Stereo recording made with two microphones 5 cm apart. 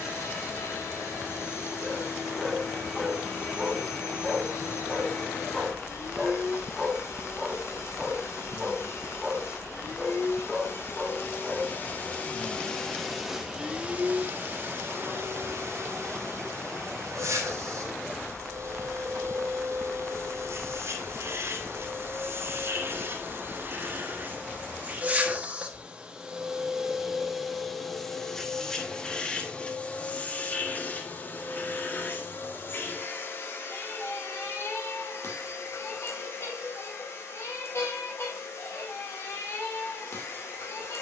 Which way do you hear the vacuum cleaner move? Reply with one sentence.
In this clip you hear the vacuum cleaner move from left to right and back again.